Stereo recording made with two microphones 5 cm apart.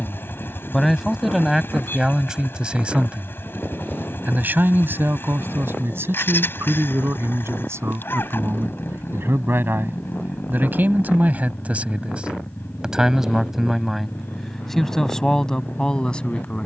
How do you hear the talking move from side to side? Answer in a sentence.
You can hear the talking go right and come back.